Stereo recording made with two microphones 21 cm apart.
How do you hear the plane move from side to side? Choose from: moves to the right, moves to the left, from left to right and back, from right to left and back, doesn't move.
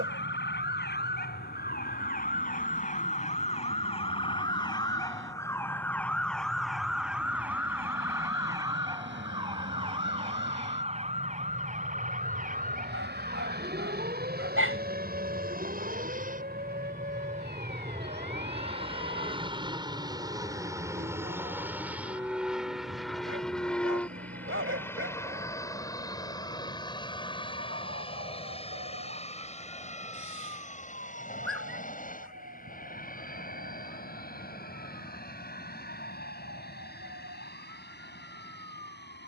moves to the left.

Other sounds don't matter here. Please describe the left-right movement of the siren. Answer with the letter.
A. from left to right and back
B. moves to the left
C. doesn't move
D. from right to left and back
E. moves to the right
E.